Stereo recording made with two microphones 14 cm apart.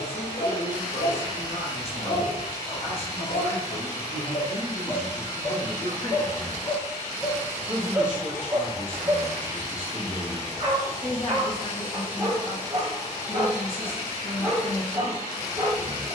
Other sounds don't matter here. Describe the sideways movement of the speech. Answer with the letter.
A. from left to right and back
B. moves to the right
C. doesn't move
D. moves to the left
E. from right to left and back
A.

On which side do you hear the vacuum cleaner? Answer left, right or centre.
left.